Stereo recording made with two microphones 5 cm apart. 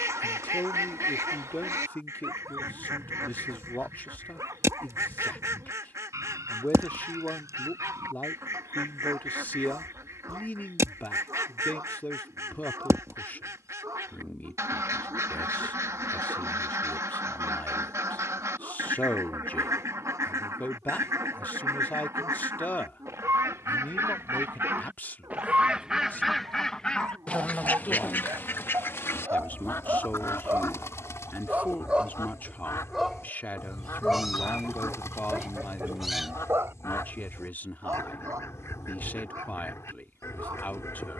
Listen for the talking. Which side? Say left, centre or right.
left.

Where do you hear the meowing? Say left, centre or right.
centre.